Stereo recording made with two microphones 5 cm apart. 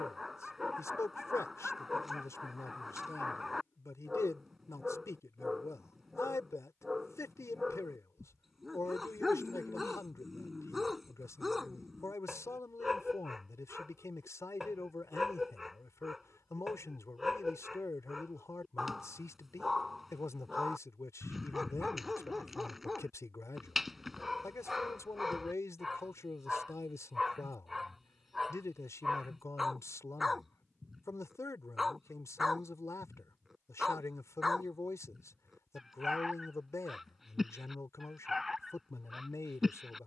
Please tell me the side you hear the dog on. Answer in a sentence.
In this clip you hear the dog in the centre.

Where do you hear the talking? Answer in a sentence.
In this clip you hear the talking on the left.